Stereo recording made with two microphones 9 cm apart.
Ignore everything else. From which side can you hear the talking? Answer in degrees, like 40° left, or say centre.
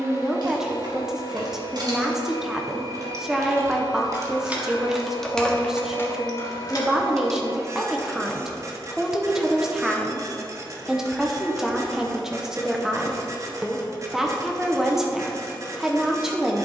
10° right.